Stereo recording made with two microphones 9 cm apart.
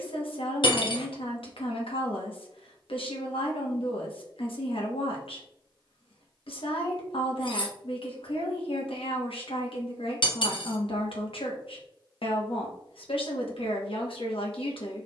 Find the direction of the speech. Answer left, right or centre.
left.